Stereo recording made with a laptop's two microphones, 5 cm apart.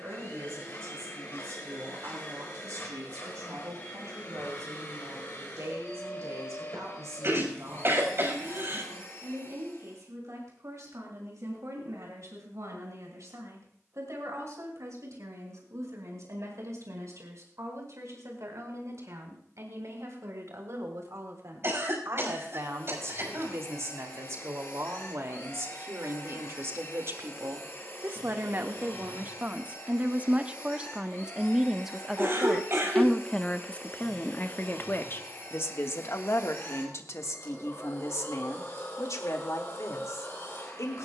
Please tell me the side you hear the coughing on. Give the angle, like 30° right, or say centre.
50° right.